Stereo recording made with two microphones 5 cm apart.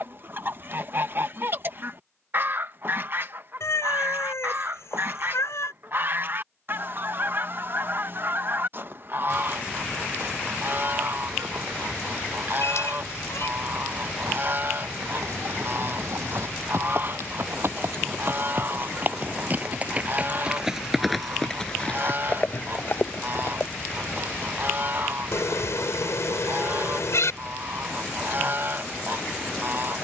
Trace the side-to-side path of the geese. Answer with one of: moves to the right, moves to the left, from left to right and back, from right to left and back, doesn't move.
doesn't move.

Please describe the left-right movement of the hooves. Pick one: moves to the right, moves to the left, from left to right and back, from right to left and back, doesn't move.
moves to the left.